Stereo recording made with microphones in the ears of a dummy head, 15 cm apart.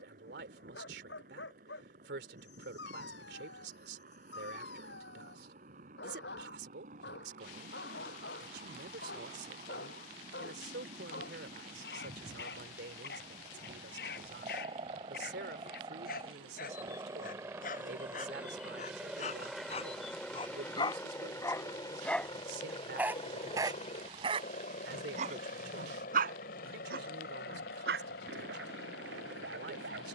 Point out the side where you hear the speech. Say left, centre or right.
right.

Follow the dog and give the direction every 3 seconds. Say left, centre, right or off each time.
left, left, left, left, left, left, left, centre, right, right.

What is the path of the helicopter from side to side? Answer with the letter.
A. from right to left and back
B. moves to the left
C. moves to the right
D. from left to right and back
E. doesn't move
B.